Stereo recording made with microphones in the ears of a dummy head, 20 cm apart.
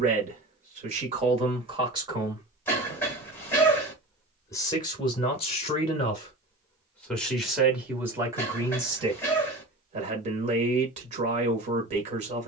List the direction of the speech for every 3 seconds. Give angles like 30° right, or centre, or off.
30° right, 20° left, centre, 30° right.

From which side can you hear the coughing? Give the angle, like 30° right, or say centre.
10° left.